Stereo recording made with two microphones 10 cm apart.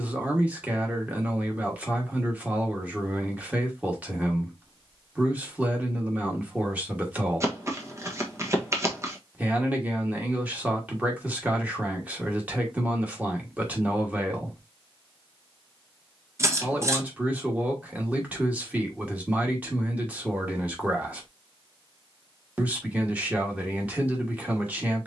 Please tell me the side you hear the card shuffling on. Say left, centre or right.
right.